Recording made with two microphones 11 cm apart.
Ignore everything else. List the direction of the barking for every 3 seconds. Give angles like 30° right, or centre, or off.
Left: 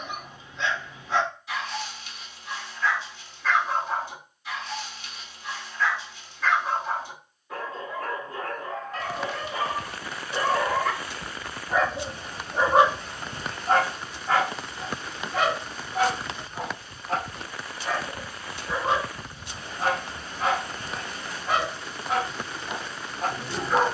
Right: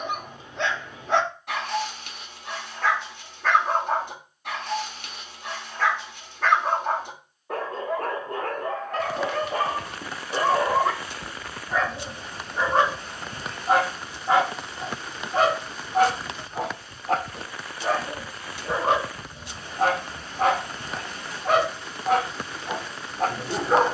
60° right, 60° right, 60° right, 30° right, centre, 50° right, 50° right, 50° right.